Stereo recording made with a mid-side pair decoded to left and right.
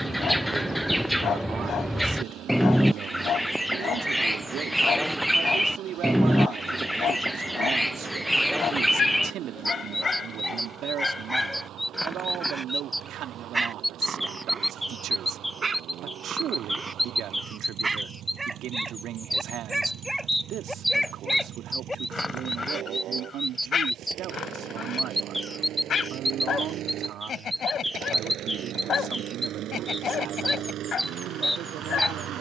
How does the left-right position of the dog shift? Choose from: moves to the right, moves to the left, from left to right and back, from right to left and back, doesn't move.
from left to right and back.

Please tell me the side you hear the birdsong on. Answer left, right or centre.
centre.